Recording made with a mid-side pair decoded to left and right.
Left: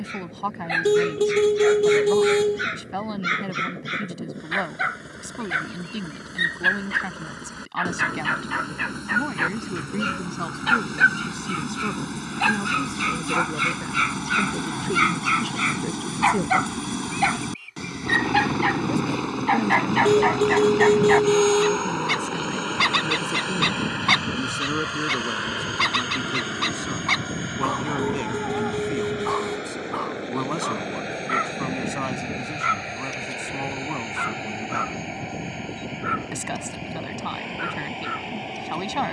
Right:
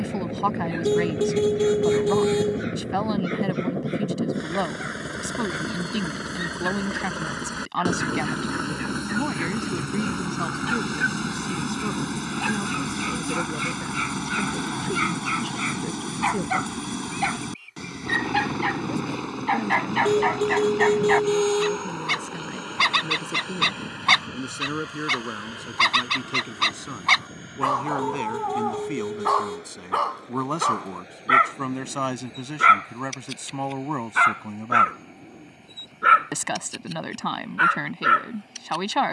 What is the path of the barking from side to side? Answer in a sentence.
You can hear the barking move from left to right.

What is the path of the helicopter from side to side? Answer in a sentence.
You can hear the helicopter move from right to left.